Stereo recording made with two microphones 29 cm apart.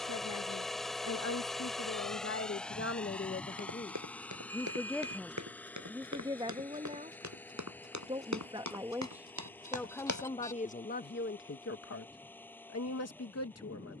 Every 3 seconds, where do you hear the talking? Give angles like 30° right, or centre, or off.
60° left, 20° left, 20° right, 30° left, 60° left.